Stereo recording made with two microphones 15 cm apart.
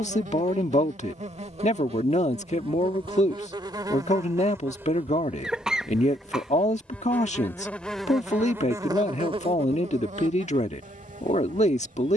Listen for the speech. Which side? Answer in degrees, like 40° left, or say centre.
50° left.